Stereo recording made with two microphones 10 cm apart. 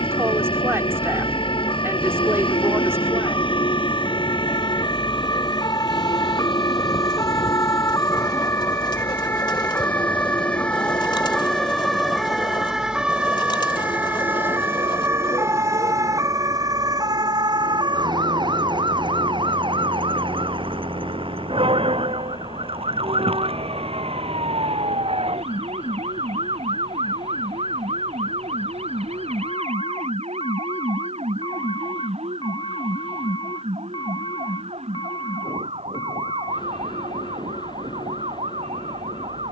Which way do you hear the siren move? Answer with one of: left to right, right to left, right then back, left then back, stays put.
left to right.